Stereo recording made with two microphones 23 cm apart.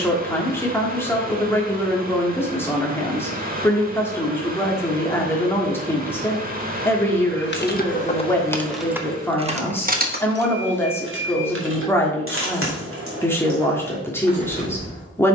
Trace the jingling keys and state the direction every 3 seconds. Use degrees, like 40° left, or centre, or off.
off, off, 20° left, 40° right, 60° right.